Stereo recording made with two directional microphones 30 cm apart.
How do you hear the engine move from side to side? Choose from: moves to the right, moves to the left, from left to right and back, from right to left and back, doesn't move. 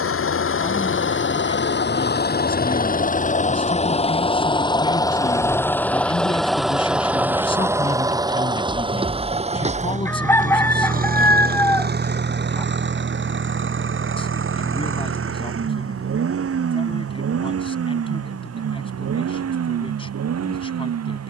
moves to the right.